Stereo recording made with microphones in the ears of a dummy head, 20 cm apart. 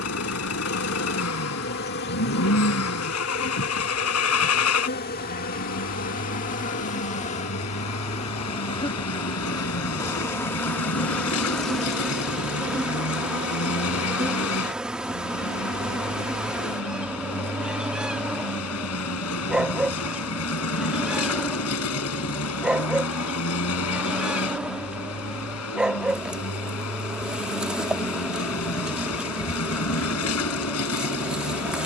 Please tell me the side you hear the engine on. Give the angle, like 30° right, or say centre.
80° left.